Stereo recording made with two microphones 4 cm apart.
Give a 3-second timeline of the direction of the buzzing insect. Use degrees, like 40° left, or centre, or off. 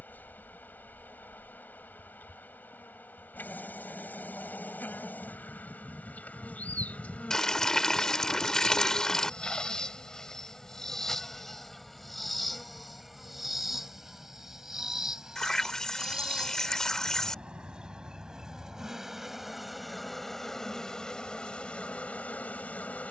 50° left, 50° left, 30° left, 10° left, 10° right, 20° right, centre, 30° left.